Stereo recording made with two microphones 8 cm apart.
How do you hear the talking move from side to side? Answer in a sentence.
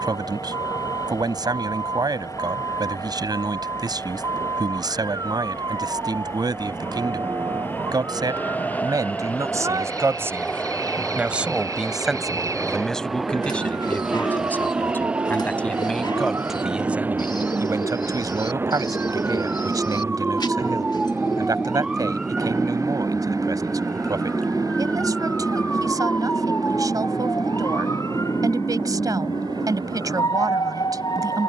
In this clip you hear the talking go left and come back.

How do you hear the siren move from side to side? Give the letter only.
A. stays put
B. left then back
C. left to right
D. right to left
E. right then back
D.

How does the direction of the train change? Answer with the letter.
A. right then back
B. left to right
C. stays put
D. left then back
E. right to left
B.